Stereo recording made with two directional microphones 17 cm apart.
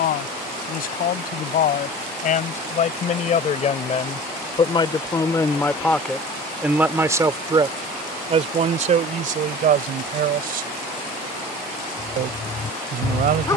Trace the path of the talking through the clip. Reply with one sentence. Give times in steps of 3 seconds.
In this clip you hear the talking on the left from 0 s and on the right from 6 s.